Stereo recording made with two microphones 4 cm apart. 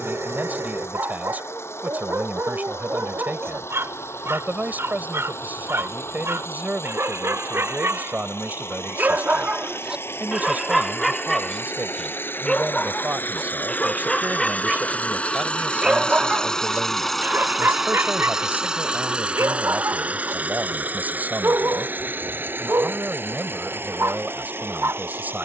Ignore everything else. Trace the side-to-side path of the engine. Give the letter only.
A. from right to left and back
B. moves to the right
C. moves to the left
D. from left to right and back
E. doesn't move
B.